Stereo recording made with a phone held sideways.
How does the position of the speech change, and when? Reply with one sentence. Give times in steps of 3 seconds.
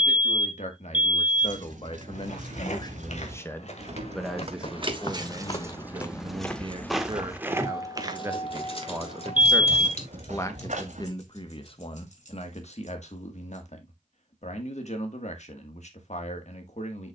You can hear the speech on the left from 0 s, in the centre from 3 s, on the right from 6 s and on the left from 9 s.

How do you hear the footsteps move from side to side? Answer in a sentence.
You can hear the footsteps move to the right.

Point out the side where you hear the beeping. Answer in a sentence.
In this clip you hear the beeping on the right.